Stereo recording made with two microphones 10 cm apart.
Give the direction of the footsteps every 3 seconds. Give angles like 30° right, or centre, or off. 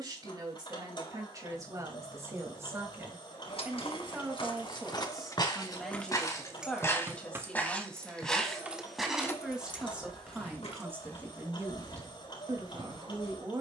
off, 50° left, 20° left, 10° left, 50° left.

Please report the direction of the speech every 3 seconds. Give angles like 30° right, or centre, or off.
30° right, 10° right, 10° left, 20° right, 40° right.